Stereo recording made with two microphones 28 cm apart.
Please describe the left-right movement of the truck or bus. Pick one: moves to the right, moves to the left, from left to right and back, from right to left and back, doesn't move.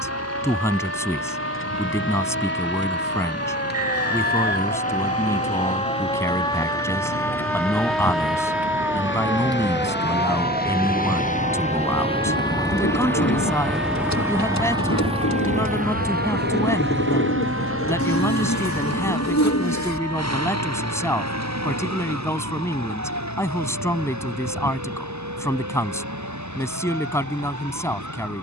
moves to the right.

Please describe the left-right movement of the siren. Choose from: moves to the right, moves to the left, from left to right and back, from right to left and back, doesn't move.
moves to the right.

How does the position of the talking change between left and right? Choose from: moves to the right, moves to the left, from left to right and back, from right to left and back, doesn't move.
doesn't move.